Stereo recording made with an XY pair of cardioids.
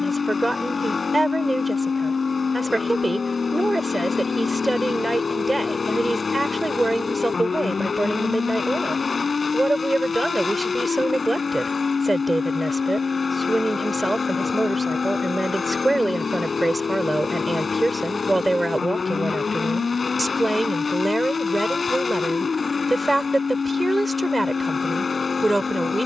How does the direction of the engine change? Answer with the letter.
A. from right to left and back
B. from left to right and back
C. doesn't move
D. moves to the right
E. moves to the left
C.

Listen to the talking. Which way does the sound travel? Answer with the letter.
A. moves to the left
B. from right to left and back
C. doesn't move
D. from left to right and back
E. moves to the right
C.